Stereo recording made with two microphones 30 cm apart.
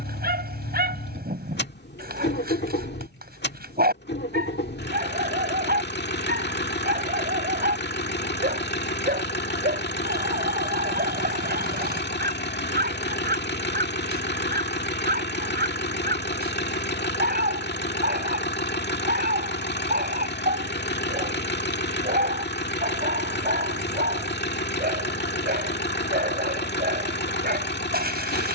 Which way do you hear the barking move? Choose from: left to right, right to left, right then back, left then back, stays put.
stays put.